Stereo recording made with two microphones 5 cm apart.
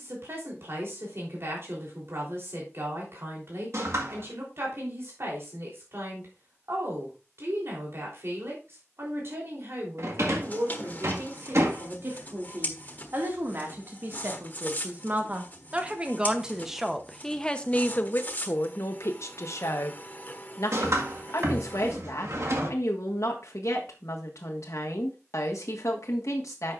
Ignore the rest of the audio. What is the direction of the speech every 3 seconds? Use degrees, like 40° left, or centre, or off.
60° right, 60° right, 60° right, 60° right, 50° right, 10° right, 60° left, 80° left, 80° left.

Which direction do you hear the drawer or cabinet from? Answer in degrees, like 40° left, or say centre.
70° right.